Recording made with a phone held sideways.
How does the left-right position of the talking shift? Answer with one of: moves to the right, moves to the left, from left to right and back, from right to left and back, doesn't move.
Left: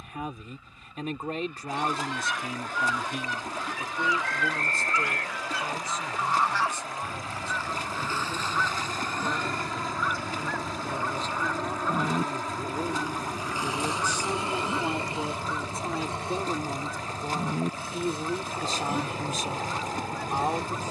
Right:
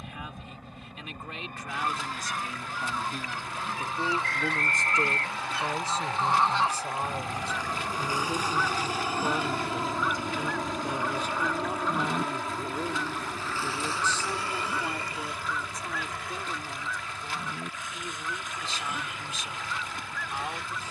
from left to right and back.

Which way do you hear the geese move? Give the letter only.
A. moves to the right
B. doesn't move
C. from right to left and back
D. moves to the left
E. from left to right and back
D.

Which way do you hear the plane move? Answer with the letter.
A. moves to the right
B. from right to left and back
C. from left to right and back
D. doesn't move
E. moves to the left
E.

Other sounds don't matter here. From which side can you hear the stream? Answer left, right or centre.
left.